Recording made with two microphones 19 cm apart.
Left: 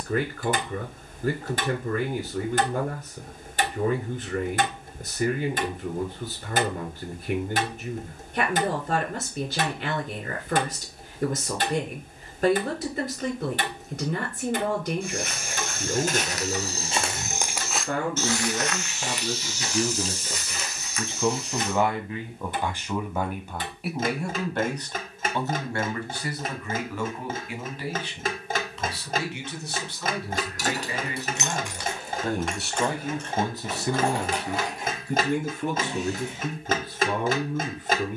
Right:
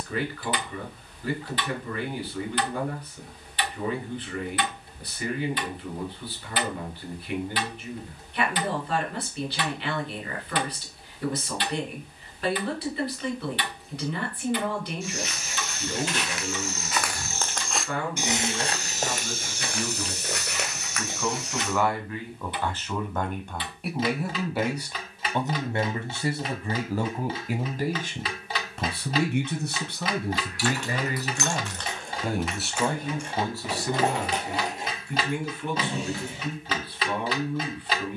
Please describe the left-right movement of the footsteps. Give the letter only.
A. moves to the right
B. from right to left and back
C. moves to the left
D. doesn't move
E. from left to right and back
A.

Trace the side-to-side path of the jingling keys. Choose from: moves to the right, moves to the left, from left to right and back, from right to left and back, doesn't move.
moves to the right.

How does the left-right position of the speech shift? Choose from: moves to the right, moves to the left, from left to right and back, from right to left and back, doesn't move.
from left to right and back.